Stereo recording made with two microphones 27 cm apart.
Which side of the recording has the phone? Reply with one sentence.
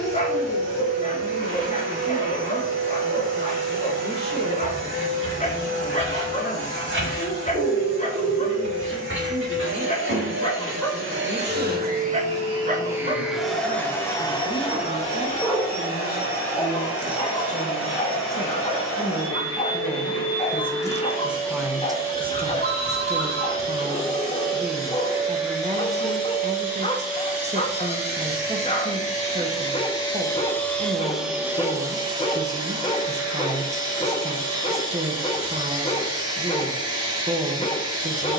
You can hear the phone on the right.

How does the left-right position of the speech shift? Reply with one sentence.
You can hear the speech move to the right.